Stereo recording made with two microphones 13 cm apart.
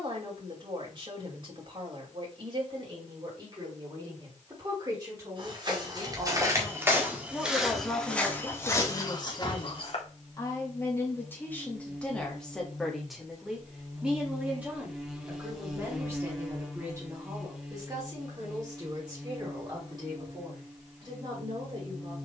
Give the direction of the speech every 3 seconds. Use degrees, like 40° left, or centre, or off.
40° right, 30° right, centre, 20° left, centre, 20° right, 30° right, 40° right.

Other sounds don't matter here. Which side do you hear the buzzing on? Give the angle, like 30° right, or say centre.
centre.